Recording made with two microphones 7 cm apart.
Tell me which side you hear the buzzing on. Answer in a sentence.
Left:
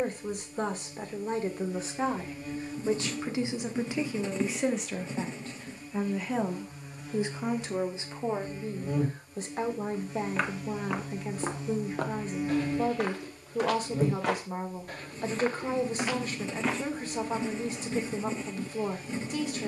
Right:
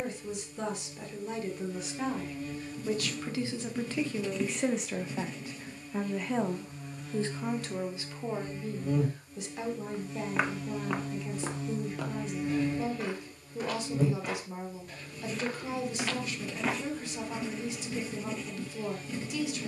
In this clip you hear the buzzing in the centre.